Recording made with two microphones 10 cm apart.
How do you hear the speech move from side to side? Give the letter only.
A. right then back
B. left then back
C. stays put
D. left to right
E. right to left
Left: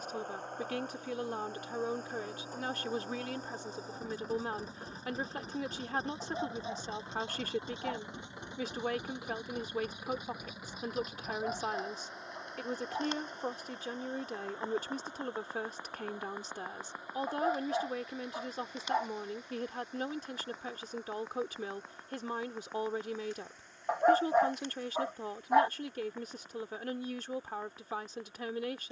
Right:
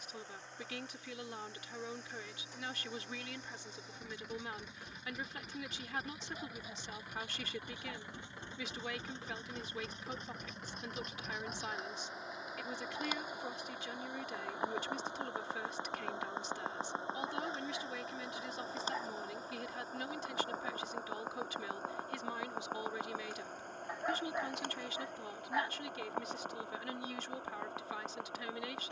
C.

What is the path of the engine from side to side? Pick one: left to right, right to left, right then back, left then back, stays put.
left to right.